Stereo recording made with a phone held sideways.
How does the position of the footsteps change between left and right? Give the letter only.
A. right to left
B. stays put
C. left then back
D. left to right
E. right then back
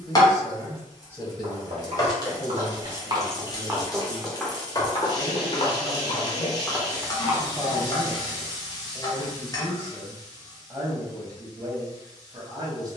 C.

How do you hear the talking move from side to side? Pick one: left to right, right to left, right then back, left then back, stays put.
left then back.